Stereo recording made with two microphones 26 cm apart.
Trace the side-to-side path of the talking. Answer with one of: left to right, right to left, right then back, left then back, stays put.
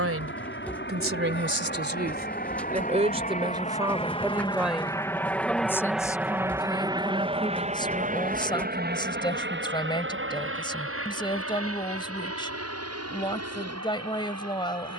right to left.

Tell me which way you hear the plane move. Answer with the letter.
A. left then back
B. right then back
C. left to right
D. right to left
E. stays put
C.